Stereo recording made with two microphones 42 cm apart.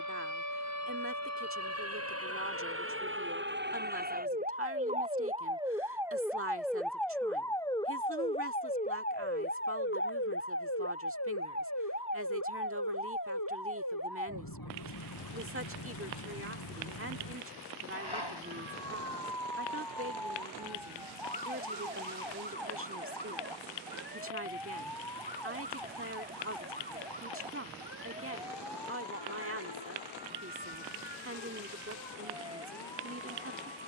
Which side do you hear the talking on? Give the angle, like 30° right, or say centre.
30° right.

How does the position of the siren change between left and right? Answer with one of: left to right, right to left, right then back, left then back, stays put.
right to left.